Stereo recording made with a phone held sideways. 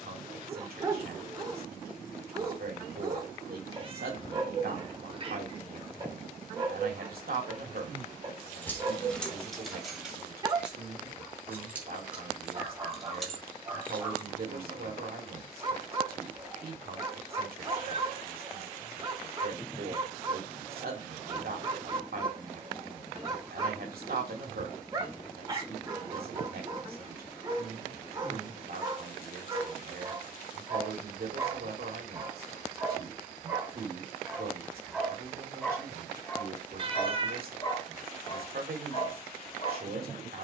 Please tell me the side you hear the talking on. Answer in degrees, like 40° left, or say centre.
70° right.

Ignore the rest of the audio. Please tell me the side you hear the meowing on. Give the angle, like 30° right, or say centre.
40° right.